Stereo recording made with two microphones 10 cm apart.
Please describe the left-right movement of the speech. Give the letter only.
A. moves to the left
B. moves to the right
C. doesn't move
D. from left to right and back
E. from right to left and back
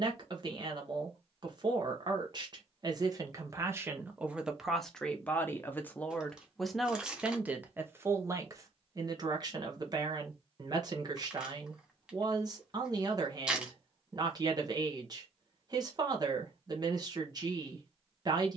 E.